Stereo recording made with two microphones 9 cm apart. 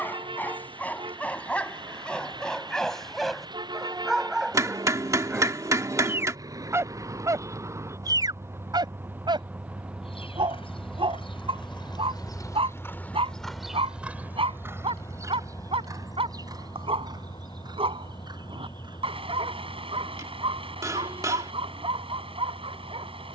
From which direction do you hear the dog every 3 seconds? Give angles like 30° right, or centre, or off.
10° left, 10° right, 40° right, 60° right, 80° right, 80° right, 80° right, 80° right.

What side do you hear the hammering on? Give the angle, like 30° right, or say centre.
40° right.